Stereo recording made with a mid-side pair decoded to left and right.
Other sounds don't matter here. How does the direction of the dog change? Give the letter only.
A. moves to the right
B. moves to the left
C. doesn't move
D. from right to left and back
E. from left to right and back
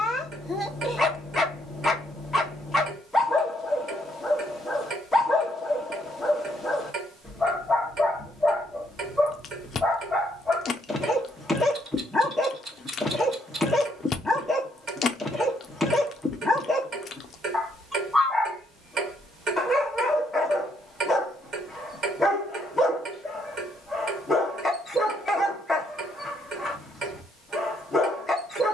C.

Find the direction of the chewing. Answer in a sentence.
In this clip you hear the chewing on the left.